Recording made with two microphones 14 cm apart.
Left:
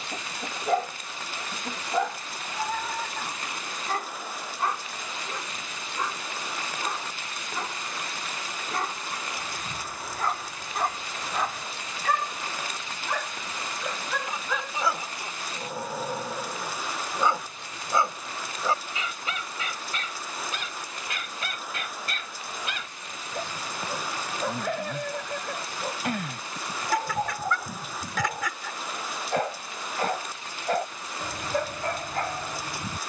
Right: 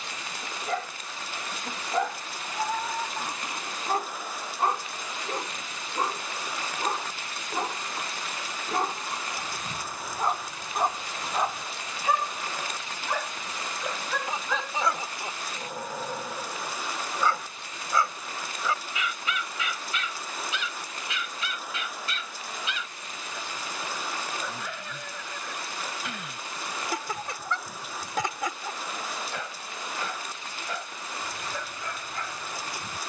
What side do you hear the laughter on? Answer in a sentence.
You can hear the laughter on the right.